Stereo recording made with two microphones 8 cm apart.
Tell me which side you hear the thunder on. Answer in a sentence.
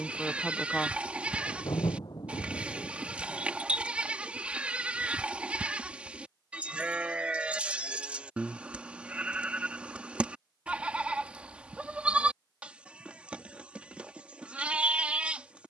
In this clip you hear the thunder on the left.